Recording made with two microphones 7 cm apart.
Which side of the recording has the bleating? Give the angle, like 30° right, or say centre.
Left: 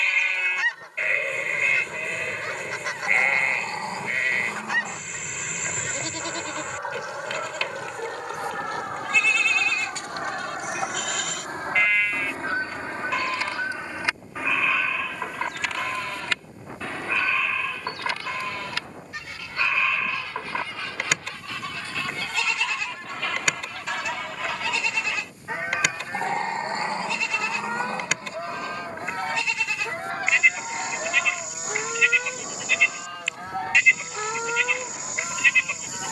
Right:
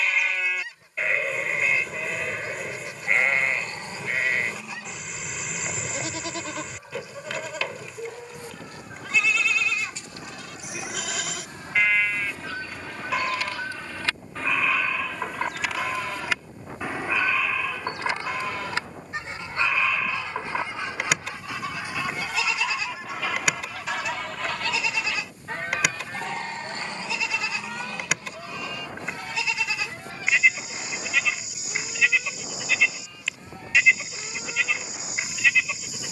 centre.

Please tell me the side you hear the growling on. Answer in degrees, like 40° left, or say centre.
30° left.